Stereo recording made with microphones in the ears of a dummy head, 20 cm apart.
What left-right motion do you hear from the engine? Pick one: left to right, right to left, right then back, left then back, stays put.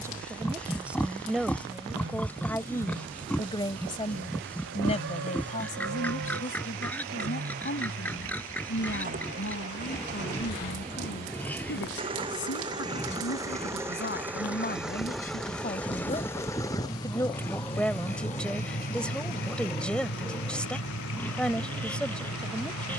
right to left.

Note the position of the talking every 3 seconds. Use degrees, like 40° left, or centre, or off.
centre, 30° left, 40° left, 50° left, 50° left, 20° left, centre, centre.